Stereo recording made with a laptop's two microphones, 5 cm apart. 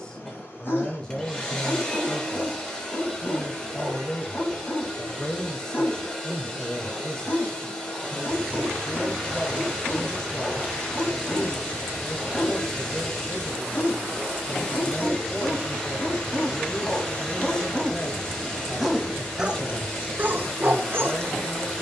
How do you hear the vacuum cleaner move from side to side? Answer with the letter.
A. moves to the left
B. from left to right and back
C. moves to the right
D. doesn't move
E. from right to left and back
D.